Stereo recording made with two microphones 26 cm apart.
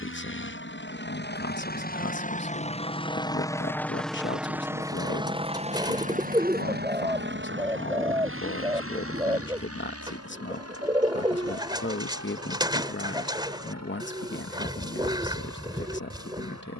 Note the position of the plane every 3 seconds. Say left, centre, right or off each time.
left, centre, right, right, right, right.